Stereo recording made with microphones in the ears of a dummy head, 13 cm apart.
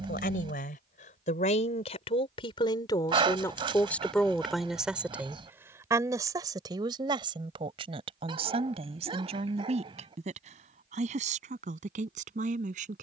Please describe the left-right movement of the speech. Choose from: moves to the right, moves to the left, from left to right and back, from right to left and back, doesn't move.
moves to the right.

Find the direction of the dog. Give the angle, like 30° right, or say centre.
40° right.